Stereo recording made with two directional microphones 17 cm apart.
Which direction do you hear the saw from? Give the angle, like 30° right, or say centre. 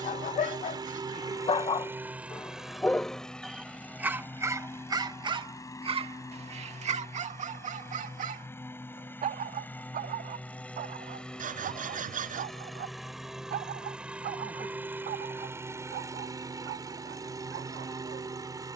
50° right.